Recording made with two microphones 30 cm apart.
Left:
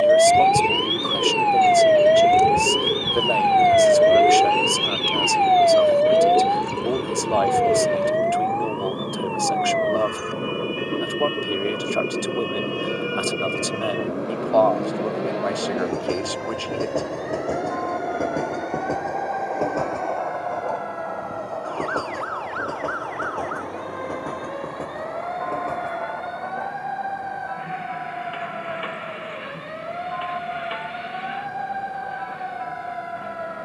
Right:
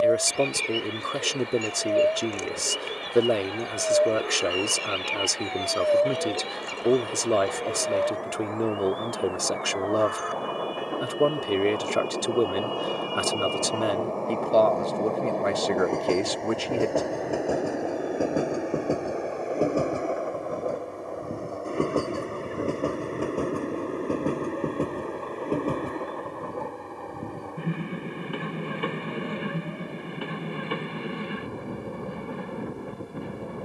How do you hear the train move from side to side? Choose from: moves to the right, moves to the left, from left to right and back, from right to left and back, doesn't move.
moves to the right.